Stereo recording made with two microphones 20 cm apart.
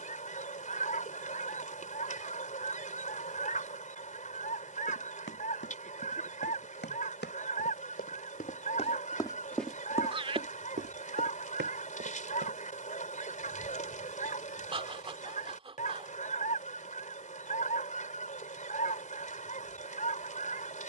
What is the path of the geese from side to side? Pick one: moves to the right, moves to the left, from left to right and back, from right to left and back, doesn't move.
doesn't move.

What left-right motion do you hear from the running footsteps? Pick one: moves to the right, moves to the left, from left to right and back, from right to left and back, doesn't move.
moves to the right.